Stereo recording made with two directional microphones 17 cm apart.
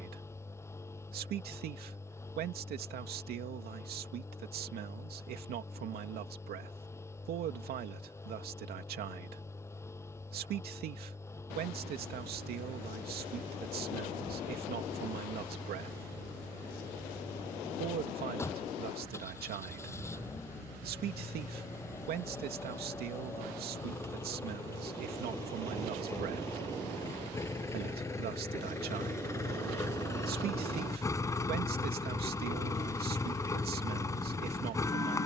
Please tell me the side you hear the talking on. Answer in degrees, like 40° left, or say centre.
70° right.